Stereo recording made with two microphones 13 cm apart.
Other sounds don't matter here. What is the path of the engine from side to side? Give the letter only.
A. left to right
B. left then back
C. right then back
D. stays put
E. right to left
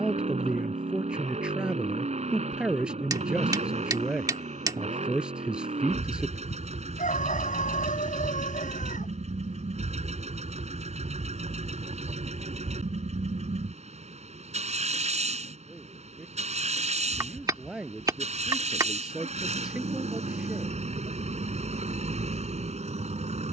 D.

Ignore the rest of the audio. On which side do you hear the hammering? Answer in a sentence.
In this clip you hear the hammering on the right.